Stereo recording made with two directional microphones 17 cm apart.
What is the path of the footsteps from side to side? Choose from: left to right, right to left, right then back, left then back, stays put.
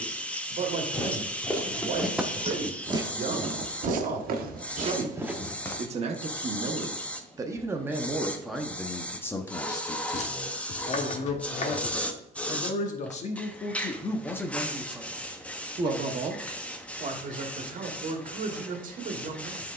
right then back.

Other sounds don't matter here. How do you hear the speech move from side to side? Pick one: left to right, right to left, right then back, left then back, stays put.
left then back.